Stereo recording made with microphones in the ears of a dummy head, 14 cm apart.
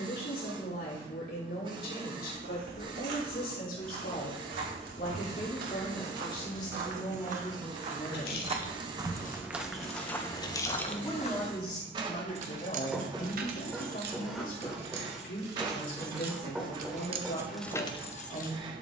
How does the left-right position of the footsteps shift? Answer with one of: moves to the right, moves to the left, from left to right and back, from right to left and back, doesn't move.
moves to the left.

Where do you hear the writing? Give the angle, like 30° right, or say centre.
centre.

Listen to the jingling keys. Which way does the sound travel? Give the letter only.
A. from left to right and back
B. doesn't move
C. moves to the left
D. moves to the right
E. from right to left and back
A.